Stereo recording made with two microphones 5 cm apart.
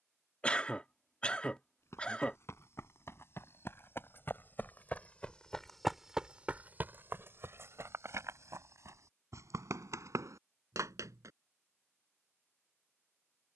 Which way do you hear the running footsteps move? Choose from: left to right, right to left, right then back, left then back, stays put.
left to right.